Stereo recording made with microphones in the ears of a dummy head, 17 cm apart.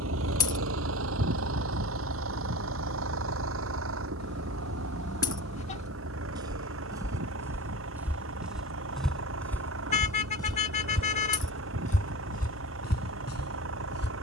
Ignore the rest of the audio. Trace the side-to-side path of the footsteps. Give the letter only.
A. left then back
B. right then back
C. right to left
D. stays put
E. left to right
C.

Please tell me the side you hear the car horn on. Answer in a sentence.
You can hear the car horn on the left.